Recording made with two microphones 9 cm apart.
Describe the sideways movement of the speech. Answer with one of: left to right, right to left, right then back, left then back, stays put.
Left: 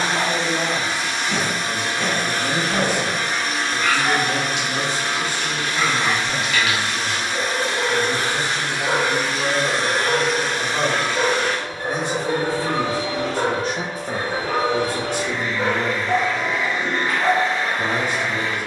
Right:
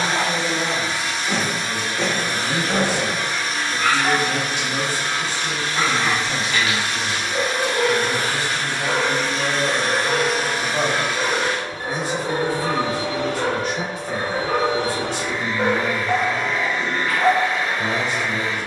right then back.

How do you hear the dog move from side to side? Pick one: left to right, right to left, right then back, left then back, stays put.
left then back.